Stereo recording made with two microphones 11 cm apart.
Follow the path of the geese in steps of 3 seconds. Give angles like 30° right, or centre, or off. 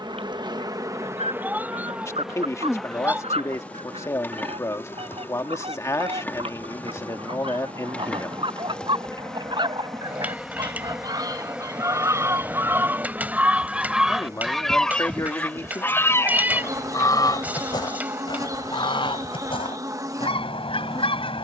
70° right, 60° right, 50° right, 40° right, 10° right, 30° left, 50° left.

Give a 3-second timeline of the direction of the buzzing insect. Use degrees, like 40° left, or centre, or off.
20° right, 20° left, 10° left, centre, 20° right, 30° right, 30° right.